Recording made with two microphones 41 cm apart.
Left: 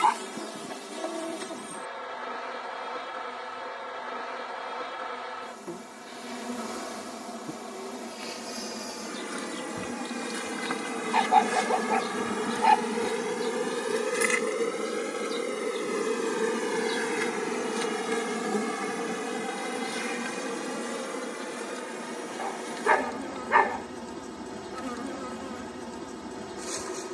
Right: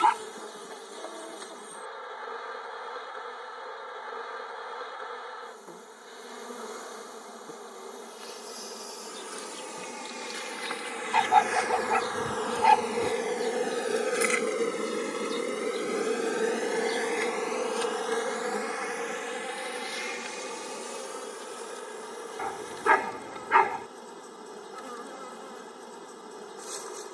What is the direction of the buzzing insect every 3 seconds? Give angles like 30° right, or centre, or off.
80° left, 80° left, 80° left, 60° left, 20° left, 10° left, 60° left, 80° left, 80° left.